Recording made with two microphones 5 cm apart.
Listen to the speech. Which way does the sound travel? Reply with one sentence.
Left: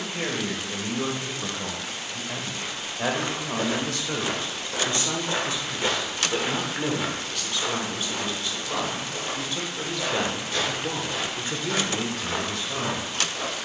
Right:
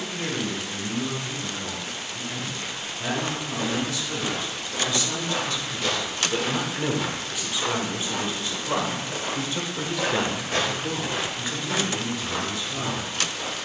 In this clip you hear the speech move from left to right and back again.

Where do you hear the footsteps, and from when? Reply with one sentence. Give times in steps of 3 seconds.
In this clip you hear the footsteps not at all from 0 s, on the left from 3 s, in the centre from 6 s, on the right from 9 s and on the left from 12 s.